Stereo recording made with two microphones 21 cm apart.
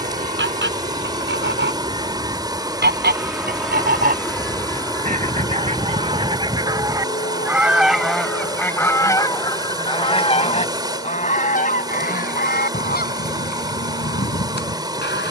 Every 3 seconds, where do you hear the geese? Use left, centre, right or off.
right, right, centre, left, left.